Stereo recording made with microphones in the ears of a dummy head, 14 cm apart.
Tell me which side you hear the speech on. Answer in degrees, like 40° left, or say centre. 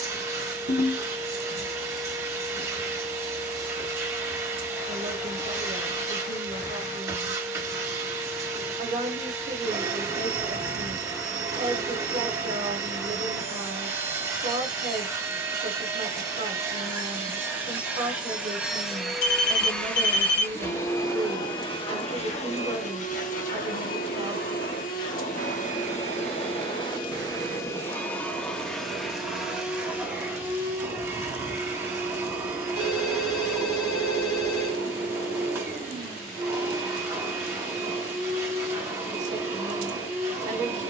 50° right.